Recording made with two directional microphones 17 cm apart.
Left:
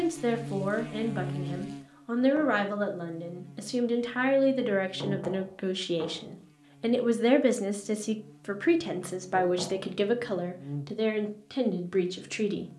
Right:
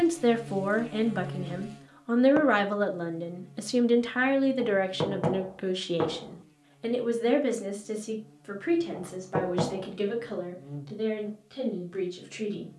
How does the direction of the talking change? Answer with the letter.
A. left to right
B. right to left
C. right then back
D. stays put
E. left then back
B.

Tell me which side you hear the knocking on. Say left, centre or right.
right.